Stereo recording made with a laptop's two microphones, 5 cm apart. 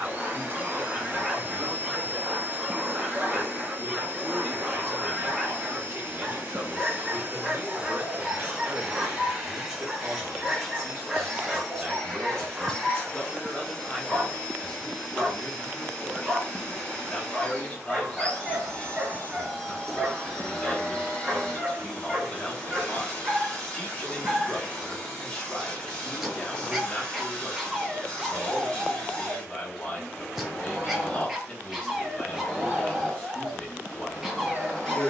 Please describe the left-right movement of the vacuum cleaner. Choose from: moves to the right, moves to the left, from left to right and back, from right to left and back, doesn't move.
moves to the left.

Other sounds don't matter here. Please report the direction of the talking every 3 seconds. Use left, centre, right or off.
right, right, right, right, centre, left, left, left, left, left, left, left.